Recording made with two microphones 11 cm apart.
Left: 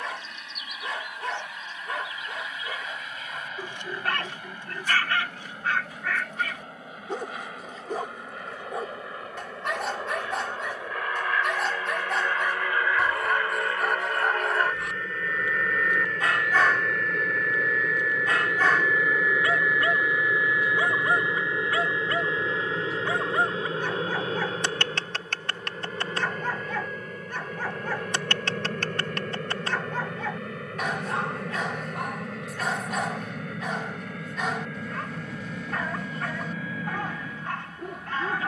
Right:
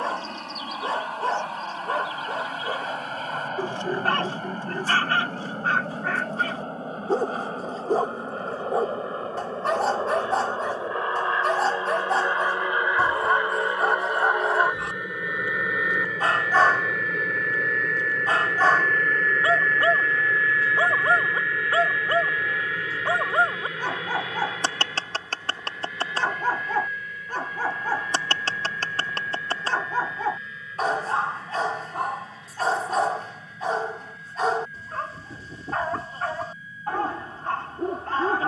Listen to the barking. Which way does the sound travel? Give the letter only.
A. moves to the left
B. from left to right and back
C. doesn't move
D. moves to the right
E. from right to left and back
C.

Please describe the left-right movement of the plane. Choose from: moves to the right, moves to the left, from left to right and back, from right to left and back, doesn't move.
moves to the left.